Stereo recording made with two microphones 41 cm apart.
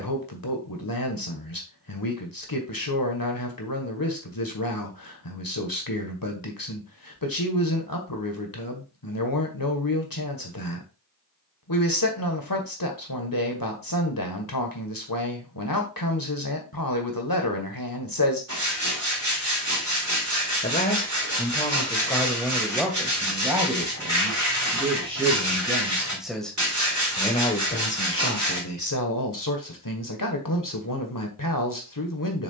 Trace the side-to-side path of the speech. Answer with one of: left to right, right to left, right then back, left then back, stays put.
right then back.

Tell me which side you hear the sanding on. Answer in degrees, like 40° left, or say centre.
40° right.